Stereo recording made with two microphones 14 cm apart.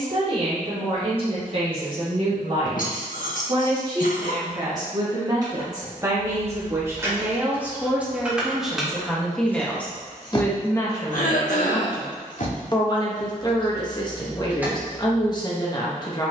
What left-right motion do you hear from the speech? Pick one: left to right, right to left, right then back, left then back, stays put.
right to left.